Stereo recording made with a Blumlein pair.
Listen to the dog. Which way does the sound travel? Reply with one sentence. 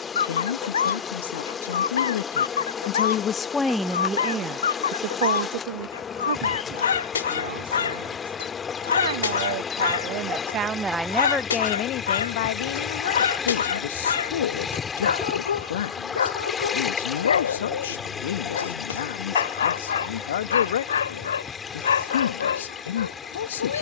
You can hear the dog stay in one place.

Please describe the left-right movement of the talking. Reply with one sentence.
You can hear the talking go right and come back.